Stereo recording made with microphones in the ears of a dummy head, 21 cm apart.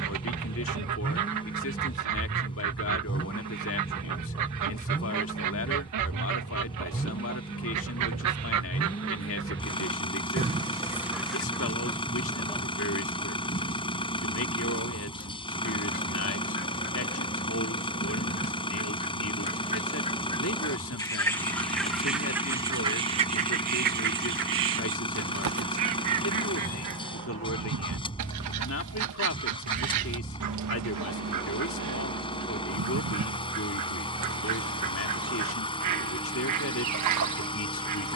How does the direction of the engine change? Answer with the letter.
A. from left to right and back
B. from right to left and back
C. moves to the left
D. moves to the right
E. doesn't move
E.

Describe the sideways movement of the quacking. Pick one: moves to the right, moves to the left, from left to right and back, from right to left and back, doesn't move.
from right to left and back.